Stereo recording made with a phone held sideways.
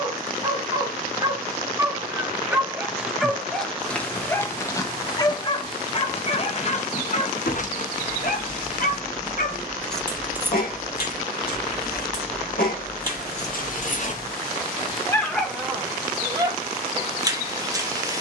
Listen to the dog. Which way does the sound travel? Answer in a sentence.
In this clip you hear the dog go left and come back.